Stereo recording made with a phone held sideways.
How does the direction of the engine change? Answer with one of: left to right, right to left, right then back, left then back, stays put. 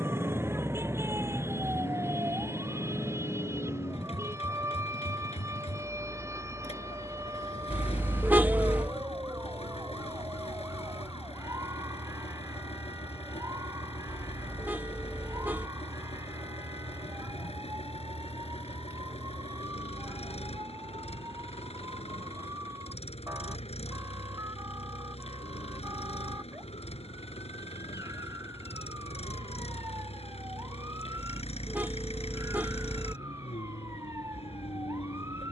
stays put.